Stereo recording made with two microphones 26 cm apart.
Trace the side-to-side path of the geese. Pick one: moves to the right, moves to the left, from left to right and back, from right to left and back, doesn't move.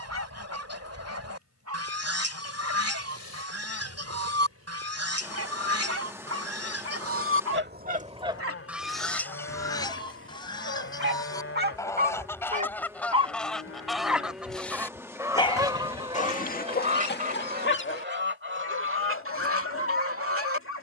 from right to left and back.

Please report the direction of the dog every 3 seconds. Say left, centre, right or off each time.
right, right, right, right, centre, left, left.